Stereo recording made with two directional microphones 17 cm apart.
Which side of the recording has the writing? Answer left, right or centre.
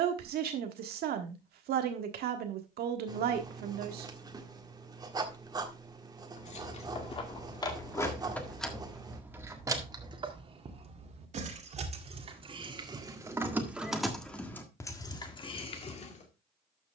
right.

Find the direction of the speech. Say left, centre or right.
right.